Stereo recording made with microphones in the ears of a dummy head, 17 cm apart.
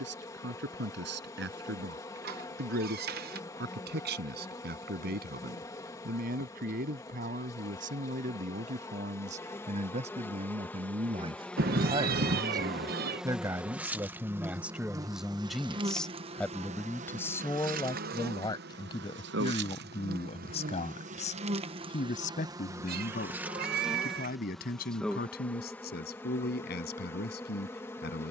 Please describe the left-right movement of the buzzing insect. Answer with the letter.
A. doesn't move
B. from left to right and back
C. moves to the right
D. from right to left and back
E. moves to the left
B.